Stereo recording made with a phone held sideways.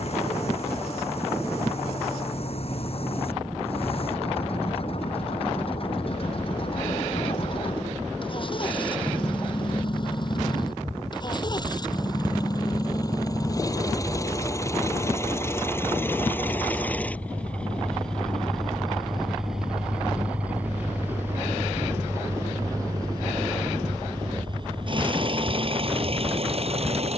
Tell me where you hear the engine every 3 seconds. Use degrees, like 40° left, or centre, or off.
50° left, 50° left, 40° left, 40° left, 30° left, 10° left, centre, 20° right, 40° right.